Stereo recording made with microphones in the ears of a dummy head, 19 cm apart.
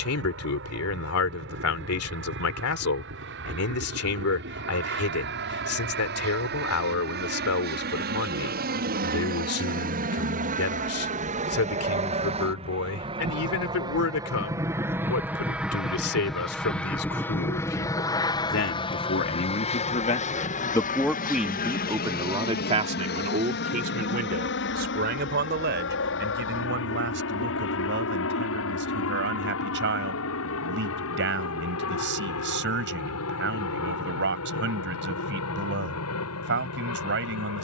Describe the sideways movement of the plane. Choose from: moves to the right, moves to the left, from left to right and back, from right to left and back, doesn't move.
moves to the left.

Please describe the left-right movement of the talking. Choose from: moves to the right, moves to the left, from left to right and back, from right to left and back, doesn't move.
moves to the right.